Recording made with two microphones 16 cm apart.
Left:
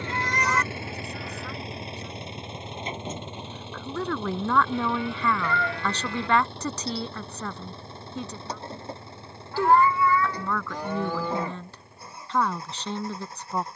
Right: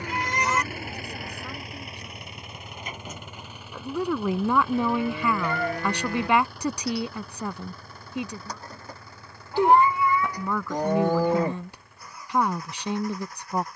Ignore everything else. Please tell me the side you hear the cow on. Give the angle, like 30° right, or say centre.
40° right.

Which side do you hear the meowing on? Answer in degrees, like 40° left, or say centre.
20° right.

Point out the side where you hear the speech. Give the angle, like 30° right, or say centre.
10° right.